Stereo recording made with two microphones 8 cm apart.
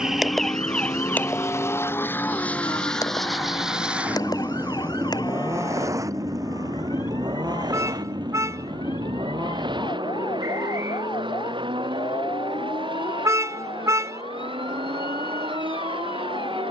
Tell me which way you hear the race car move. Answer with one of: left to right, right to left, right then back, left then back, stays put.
left to right.